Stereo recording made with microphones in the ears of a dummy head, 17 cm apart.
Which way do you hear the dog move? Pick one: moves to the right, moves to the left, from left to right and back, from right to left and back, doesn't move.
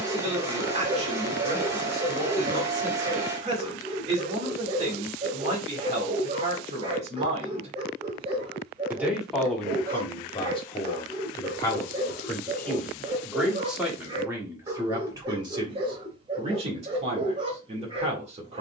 doesn't move.